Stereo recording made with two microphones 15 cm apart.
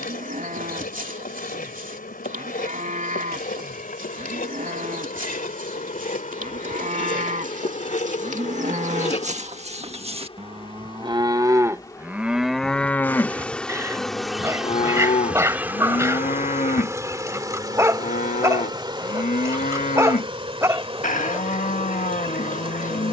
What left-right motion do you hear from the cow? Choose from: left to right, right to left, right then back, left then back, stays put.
right to left.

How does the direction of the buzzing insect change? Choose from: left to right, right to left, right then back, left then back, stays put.
left to right.